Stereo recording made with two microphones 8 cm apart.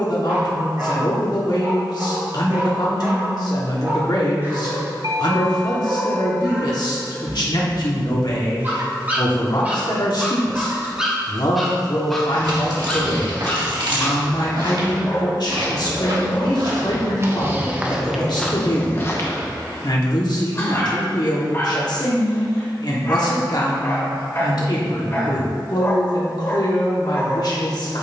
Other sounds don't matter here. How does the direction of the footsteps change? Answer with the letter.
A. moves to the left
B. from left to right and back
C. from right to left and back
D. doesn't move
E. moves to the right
A.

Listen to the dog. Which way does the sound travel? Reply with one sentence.
You can hear the dog move to the left.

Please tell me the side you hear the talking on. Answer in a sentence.
In this clip you hear the talking on the left.